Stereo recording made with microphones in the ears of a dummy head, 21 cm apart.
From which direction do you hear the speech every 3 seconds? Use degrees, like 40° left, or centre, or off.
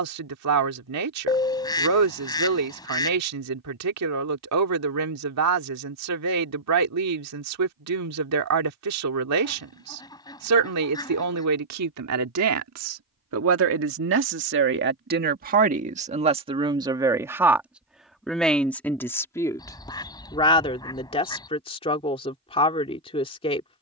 80° right, 80° right, 80° right, 80° right, 60° right, 20° right, 10° left, 20° left.